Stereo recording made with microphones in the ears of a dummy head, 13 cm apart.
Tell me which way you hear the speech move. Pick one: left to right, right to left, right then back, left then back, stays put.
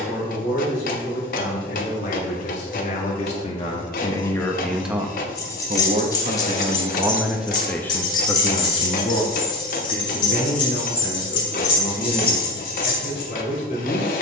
right then back.